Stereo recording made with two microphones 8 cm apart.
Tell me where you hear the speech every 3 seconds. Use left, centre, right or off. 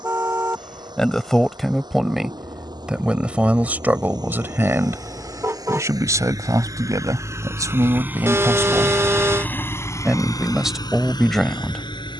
centre, right, right, centre.